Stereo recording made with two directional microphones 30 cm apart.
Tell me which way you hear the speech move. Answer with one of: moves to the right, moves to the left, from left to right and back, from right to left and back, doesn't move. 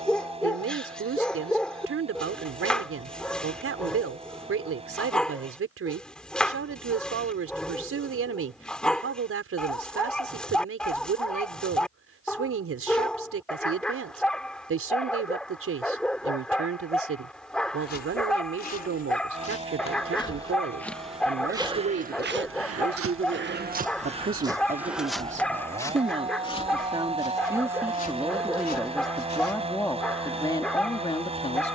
moves to the left.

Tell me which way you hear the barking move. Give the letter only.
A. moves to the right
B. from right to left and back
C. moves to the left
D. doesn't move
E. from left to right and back
D.